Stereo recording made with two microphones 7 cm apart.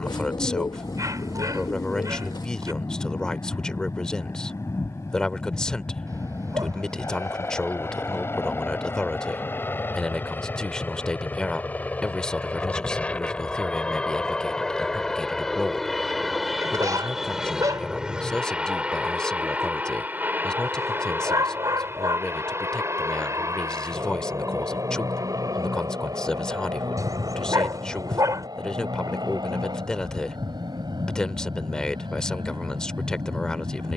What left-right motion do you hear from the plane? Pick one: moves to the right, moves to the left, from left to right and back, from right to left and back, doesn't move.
moves to the right.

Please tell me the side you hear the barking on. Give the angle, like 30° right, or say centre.
50° right.